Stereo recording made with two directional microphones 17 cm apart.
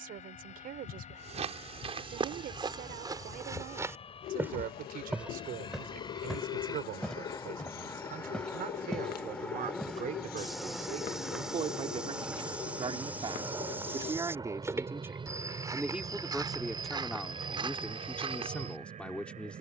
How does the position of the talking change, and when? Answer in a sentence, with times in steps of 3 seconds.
In this clip you hear the talking on the right from 0 s and in the centre from 15 s.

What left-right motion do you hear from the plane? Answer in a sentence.
You can hear the plane move from left to right.